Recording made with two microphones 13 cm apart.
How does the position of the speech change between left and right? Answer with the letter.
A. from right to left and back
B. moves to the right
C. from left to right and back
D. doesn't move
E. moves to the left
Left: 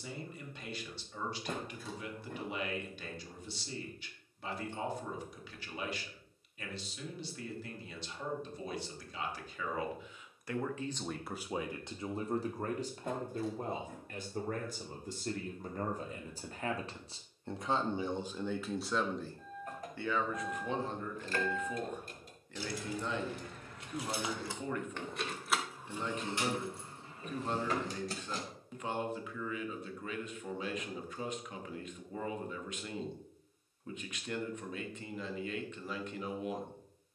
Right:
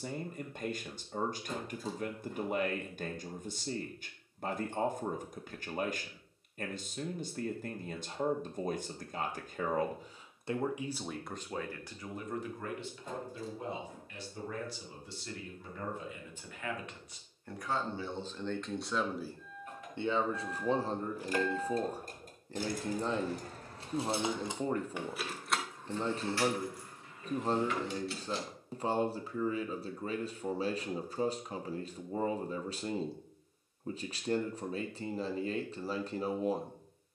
A.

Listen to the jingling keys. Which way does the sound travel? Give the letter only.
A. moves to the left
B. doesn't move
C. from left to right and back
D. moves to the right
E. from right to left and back
C.